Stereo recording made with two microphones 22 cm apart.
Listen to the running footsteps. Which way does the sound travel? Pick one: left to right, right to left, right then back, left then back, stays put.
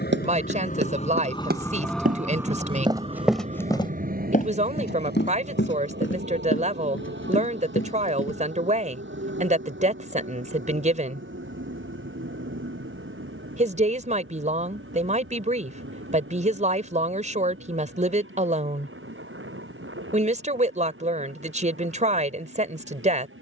right to left.